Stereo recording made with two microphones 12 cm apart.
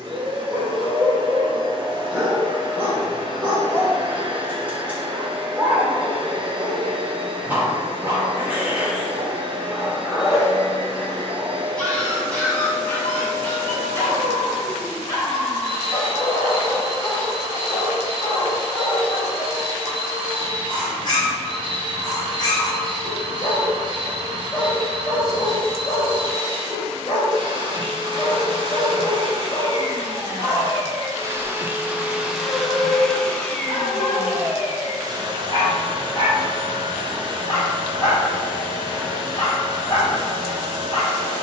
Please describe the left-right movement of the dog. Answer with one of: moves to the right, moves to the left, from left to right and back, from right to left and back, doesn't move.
moves to the left.